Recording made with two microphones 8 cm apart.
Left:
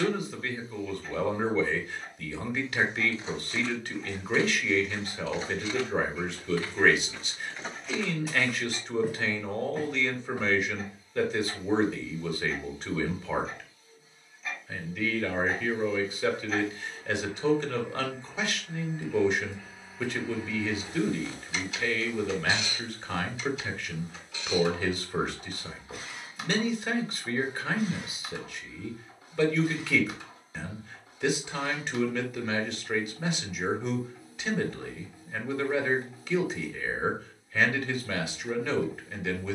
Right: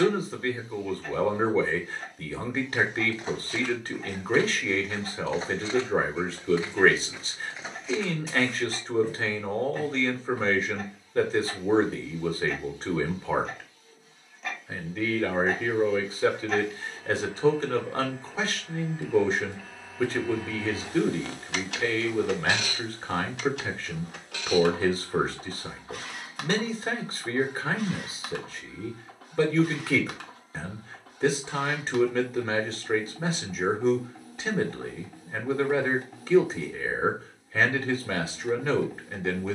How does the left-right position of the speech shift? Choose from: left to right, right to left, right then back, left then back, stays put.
stays put.